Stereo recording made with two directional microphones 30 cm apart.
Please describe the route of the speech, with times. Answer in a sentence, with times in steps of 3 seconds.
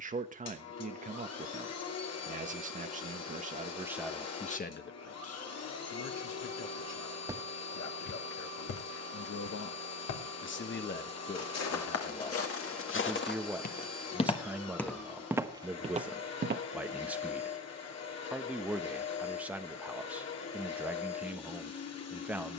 You can hear the speech on the right from 0 s, in the centre from 3 s, on the left from 6 s and in the centre from 12 s.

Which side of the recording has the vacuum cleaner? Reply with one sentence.
You can hear the vacuum cleaner on the left.